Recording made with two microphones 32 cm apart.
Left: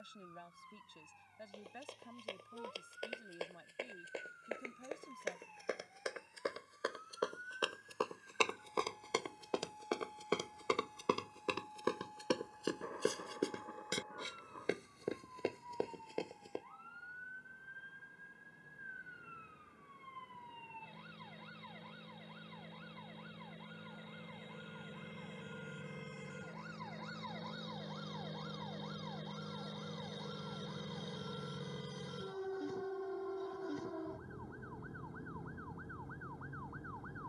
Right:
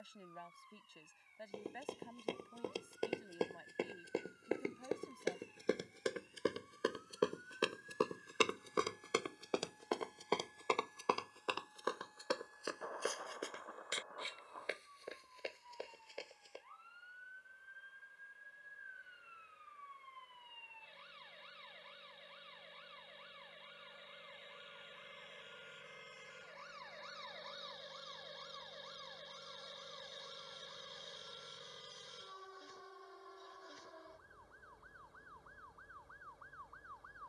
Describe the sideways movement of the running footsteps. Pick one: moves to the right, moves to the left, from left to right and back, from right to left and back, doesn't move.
moves to the left.